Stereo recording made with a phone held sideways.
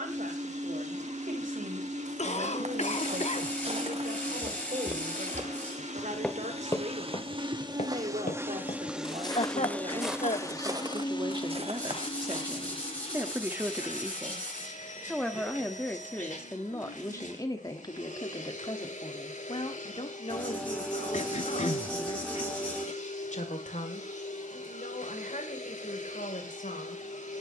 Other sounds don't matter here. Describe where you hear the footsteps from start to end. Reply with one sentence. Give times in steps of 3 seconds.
You can hear the footsteps on the right from 0 s, on the left from 6 s, in the centre from 9 s, on the right from 12 s and not at all from 15 s.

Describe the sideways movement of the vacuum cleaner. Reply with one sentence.
You can hear the vacuum cleaner move to the left.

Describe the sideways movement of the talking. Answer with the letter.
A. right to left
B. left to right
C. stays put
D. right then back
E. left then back
A.